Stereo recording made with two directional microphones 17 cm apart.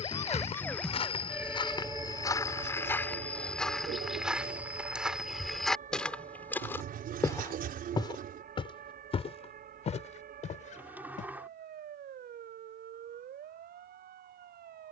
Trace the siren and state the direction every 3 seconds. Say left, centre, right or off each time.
centre, right, right, right, right.